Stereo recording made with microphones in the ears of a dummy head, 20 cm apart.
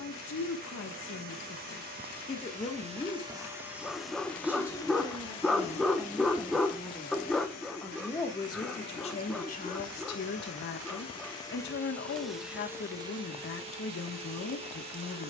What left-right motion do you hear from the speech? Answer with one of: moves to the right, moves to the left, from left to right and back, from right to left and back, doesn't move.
from left to right and back.